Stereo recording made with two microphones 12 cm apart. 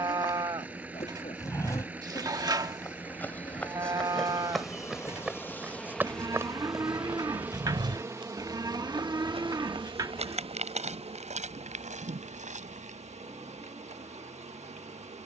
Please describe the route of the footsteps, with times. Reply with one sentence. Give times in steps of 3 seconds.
You can hear the footsteps on the left from 0 s, in the centre from 3 s and on the right from 6 s.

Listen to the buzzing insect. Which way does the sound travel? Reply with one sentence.
You can hear the buzzing insect travel towards the right.